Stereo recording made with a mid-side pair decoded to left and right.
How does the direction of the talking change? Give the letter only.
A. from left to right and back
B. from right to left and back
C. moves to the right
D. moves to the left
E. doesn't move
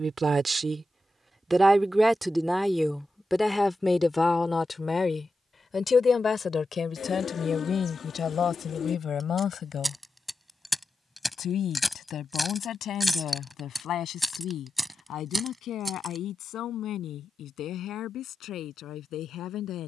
D.